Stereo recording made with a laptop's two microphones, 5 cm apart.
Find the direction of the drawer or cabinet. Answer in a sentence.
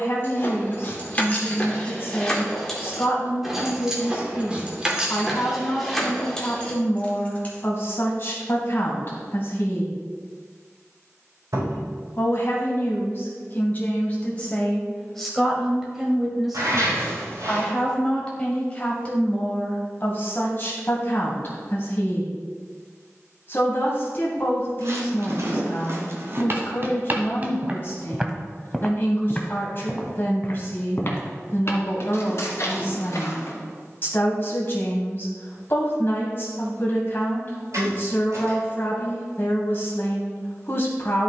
You can hear the drawer or cabinet on the right.